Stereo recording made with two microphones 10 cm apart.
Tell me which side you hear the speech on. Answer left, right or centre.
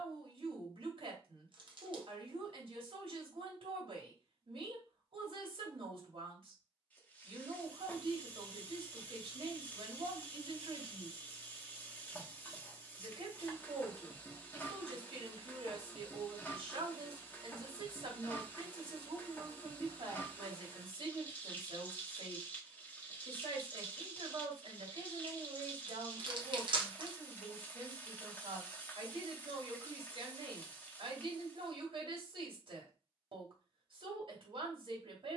right.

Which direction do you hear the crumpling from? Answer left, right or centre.
right.